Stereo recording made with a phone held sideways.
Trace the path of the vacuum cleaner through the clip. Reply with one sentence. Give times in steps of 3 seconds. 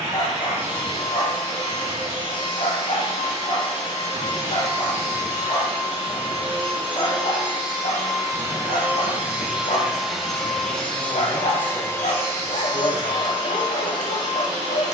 In this clip you hear the vacuum cleaner on the right from 0 s, in the centre from 9 s and on the left from 12 s.